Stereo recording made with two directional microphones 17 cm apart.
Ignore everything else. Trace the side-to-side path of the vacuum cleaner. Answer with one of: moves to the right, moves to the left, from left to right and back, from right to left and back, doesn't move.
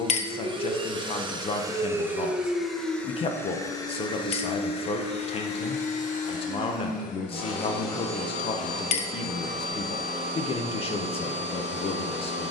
moves to the left.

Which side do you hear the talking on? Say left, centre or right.
left.